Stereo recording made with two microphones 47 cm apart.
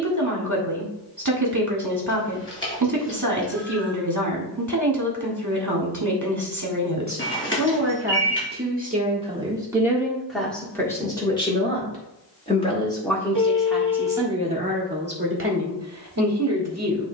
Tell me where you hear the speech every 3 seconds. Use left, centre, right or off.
right, right, right, centre, centre, right.